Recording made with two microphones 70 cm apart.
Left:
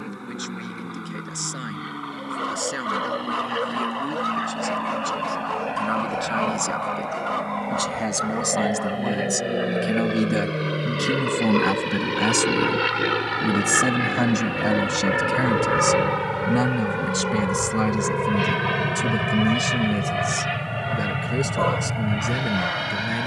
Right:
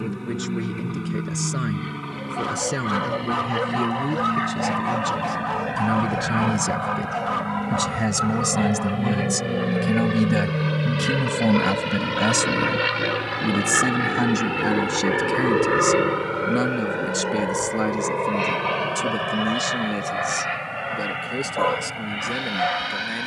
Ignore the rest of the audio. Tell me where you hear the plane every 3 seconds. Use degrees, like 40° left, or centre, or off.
60° right, 50° right, 50° right, 30° right, centre, 30° left, 50° left, 60° left.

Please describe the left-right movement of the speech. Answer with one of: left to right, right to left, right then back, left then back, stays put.
right to left.